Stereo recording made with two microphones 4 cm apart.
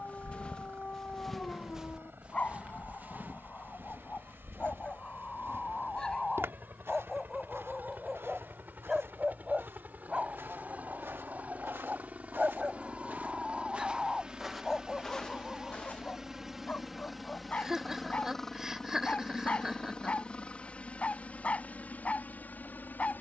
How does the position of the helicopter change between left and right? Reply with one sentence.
You can hear the helicopter move from right to left.